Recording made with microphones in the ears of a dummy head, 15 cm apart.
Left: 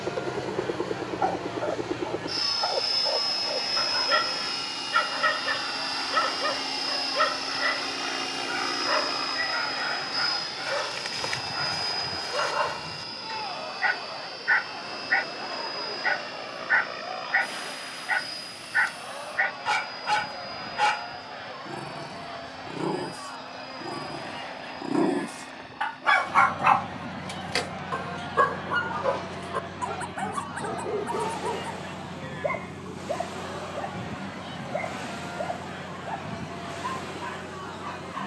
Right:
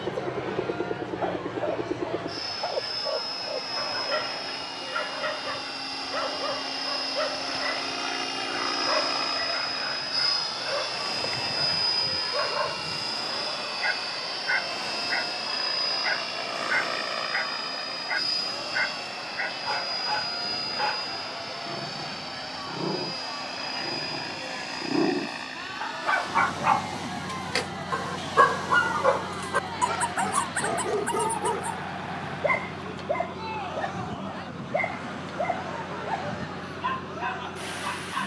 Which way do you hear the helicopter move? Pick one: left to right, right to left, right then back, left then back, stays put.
left to right.